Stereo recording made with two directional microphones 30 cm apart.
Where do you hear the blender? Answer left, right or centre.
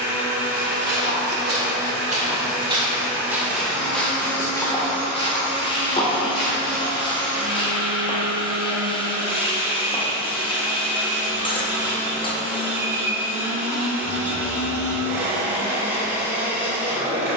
centre.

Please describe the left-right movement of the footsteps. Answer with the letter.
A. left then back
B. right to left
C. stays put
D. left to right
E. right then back
B.